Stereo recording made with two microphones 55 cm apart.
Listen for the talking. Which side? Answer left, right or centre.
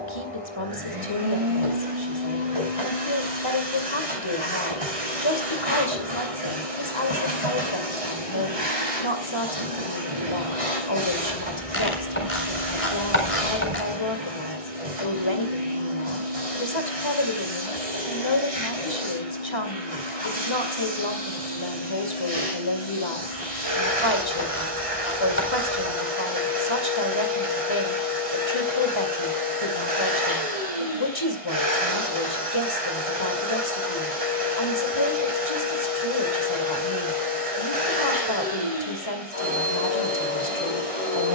left.